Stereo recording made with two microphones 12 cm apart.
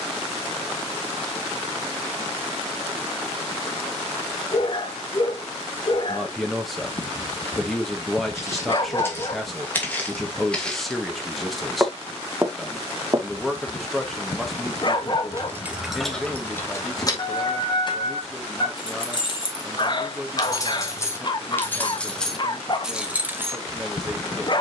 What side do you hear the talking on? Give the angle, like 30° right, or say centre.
centre.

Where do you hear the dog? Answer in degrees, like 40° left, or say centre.
40° left.